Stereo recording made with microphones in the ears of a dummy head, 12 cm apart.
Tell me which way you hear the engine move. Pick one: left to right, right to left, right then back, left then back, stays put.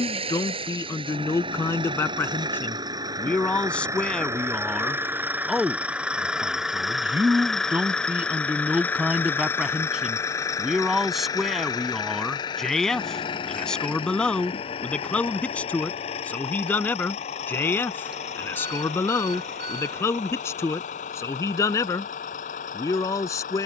right to left.